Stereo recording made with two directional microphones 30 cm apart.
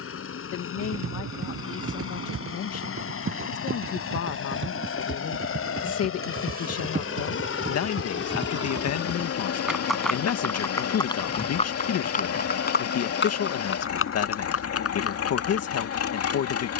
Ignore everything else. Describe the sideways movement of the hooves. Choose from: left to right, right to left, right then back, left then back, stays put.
right to left.